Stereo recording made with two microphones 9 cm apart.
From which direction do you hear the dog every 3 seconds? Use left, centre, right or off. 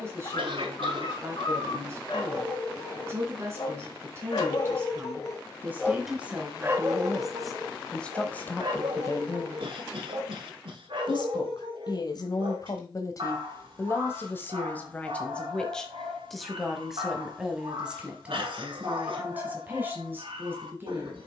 left, left, right, right, right, right, right.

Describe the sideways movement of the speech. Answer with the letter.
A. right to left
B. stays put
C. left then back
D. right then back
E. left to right
C.